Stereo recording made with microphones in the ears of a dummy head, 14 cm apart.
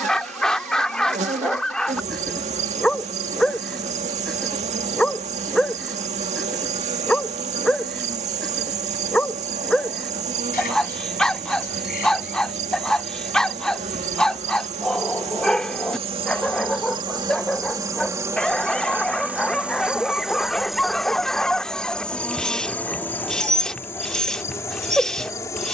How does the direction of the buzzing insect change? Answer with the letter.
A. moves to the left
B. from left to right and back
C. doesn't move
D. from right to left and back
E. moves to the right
A.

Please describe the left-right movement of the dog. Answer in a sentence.
You can hear the dog stay in one place.